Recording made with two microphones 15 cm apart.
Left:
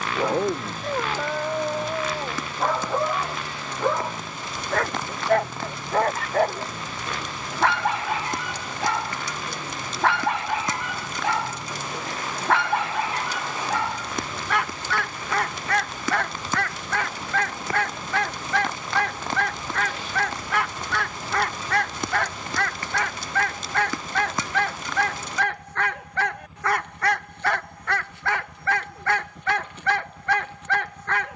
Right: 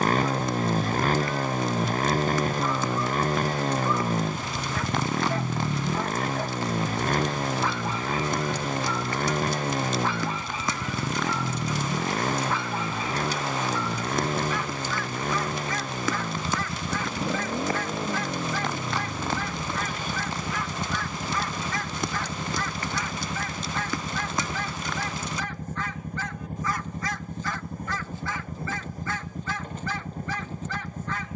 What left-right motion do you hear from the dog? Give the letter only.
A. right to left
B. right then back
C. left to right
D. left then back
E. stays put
E.